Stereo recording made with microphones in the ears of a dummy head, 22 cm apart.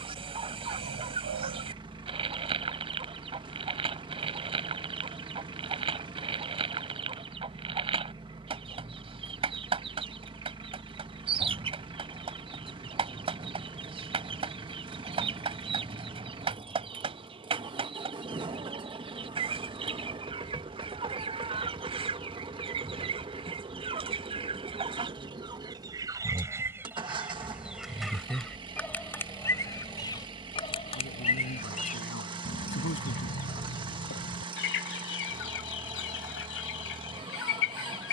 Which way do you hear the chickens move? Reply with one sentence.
You can hear the chickens move from right to left.